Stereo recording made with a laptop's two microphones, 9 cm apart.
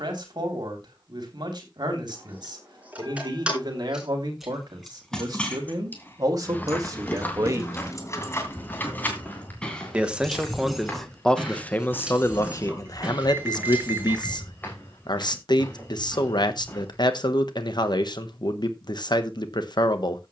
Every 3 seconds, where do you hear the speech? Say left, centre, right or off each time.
right, right, right, centre, left, left, left.